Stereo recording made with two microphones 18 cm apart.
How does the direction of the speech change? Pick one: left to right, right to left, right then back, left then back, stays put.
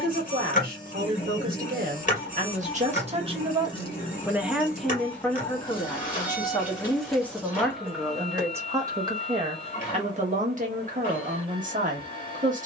left then back.